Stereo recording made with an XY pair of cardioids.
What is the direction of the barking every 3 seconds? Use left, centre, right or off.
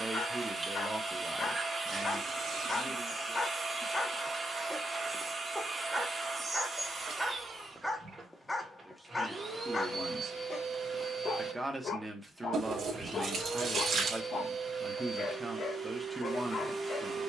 left, centre, centre, left, left, left.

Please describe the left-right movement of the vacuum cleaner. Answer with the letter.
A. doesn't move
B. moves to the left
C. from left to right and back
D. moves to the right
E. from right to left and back
A.